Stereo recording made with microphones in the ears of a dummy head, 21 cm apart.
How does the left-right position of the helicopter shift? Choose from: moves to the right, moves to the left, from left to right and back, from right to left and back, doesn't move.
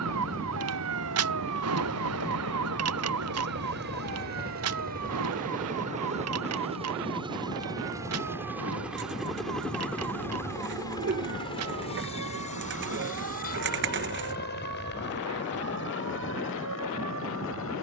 moves to the left.